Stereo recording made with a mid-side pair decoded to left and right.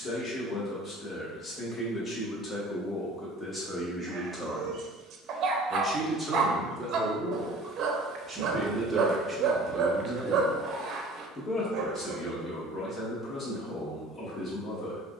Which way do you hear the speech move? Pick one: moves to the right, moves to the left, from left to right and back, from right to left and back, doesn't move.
from left to right and back.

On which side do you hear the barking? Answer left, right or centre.
right.